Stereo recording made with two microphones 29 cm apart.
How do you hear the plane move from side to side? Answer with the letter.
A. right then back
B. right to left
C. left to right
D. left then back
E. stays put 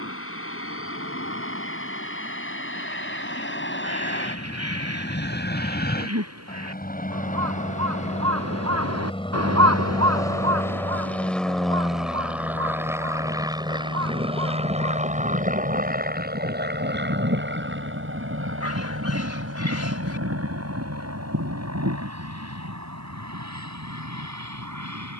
C.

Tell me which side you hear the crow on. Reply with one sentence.
In this clip you hear the crow on the right.